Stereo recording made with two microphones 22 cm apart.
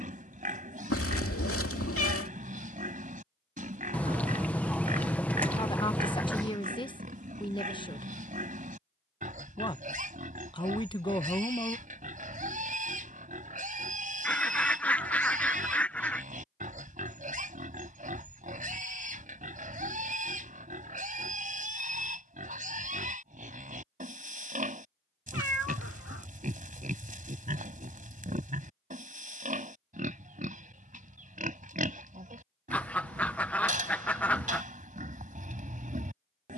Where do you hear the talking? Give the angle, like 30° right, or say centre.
20° left.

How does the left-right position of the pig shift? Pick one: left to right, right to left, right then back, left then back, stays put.
stays put.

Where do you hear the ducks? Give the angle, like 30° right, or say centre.
10° left.